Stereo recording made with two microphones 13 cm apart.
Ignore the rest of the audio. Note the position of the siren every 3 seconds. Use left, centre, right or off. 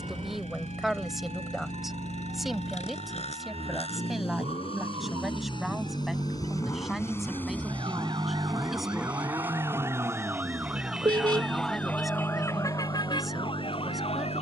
right, right, right, centre, left.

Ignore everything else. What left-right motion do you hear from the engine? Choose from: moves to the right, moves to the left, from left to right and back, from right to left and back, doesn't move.
moves to the right.